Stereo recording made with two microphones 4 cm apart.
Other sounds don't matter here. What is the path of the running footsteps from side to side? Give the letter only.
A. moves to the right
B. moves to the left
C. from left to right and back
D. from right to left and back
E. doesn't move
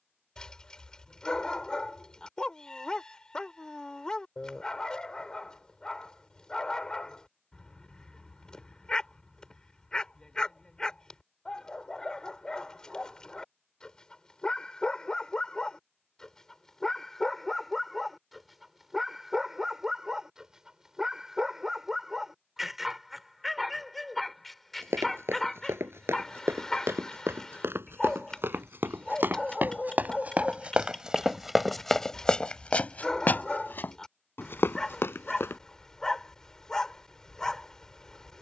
B.